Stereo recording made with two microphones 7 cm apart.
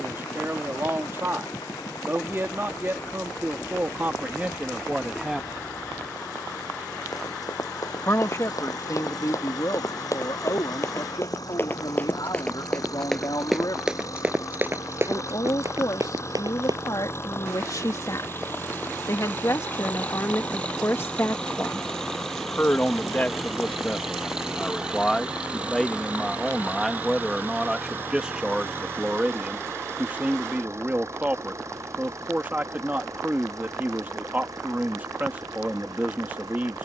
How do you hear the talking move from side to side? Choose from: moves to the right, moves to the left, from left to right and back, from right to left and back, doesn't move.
from right to left and back.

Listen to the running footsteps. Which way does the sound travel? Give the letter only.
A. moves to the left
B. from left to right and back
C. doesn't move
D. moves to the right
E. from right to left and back
D.